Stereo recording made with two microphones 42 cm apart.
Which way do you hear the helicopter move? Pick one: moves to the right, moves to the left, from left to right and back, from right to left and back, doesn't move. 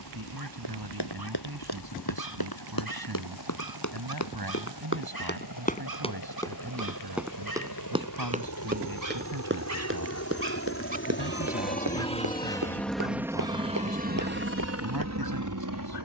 moves to the right.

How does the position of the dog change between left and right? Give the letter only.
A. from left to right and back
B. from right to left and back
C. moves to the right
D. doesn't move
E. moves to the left
E.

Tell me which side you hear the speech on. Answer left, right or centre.
right.